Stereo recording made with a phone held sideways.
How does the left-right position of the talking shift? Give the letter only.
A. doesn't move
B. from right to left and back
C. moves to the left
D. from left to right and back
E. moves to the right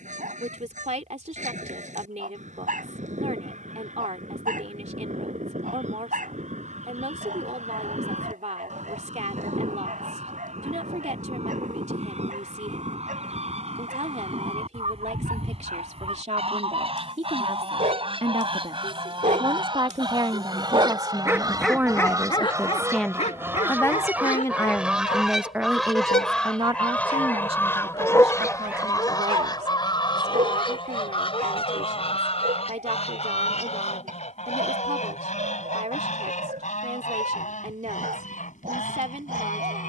B.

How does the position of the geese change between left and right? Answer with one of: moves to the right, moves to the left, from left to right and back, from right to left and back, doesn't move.
moves to the left.